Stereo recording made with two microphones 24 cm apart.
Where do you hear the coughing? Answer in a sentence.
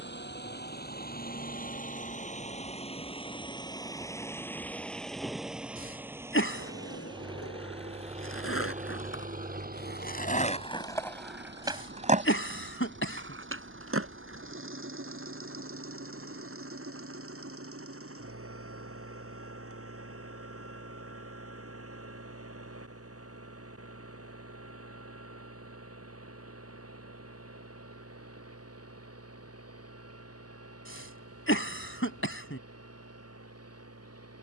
In this clip you hear the coughing on the left.